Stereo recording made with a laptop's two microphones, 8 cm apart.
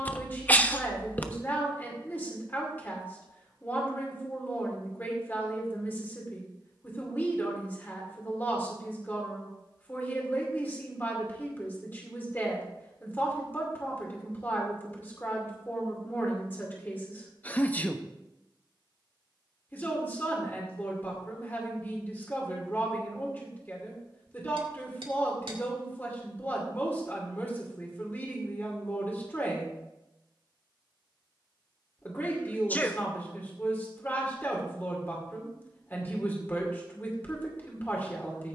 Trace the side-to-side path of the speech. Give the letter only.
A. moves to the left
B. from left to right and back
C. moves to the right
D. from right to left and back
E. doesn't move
E.